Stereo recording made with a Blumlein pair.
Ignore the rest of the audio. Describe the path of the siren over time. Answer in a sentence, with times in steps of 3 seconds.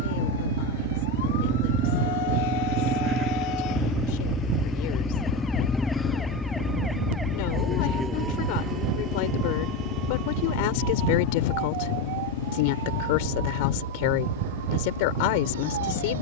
You can hear the siren on the left from 0 s, in the centre from 6 s and on the right from 9 s.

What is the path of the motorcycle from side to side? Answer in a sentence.
In this clip you hear the motorcycle go from the right side to the left.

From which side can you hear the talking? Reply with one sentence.
In this clip you hear the talking on the left.